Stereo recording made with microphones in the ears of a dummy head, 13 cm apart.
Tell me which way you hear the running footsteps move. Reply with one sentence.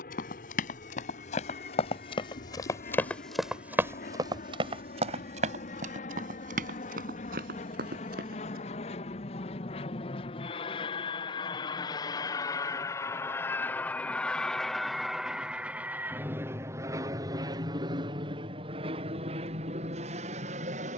In this clip you hear the running footsteps travel towards the right.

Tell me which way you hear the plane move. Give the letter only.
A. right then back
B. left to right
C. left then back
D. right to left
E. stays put
B.